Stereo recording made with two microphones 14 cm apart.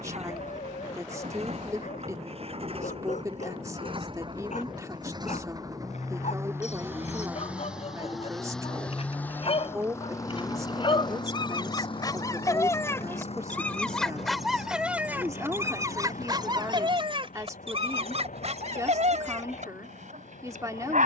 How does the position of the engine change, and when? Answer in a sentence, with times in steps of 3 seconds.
You can hear the engine on the right from 0 s, in the centre from 6 s and on the left from 9 s.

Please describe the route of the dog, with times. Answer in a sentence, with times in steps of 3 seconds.
In this clip you hear the dog on the left from 0 s, in the centre from 12 s and on the right from 15 s.